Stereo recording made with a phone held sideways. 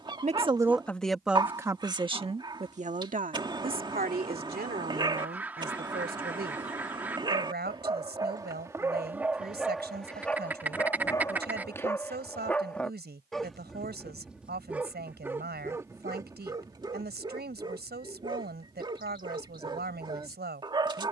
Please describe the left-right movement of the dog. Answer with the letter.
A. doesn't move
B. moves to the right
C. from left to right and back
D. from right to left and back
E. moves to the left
D.